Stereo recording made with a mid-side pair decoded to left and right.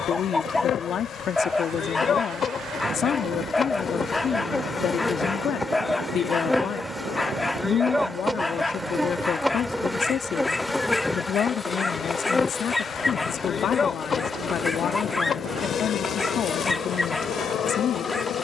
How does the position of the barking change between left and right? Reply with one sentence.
In this clip you hear the barking stay in one place.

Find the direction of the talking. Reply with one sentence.
You can hear the talking on the left.